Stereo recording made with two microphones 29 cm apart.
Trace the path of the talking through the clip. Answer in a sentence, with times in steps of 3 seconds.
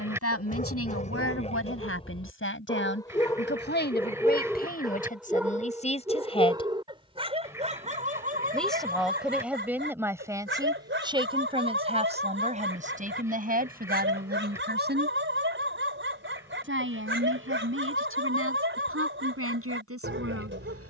In this clip you hear the talking on the left from 0 s, in the centre from 6 s and on the right from 12 s.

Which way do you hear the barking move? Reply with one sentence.
In this clip you hear the barking move from left to right.